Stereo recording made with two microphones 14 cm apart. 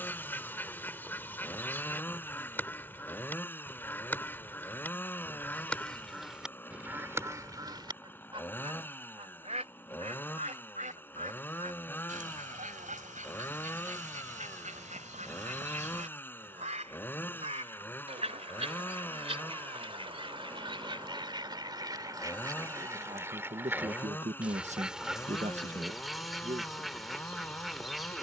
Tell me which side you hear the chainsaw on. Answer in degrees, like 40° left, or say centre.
10° left.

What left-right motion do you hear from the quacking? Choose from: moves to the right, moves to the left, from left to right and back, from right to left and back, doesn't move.
from left to right and back.